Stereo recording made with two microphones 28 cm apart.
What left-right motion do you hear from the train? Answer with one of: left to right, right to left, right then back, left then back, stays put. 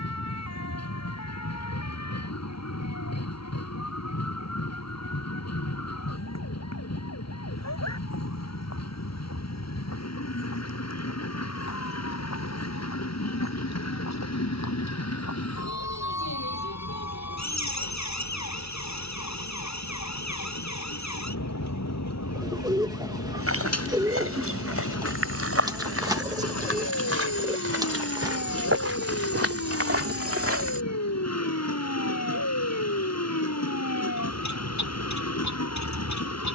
stays put.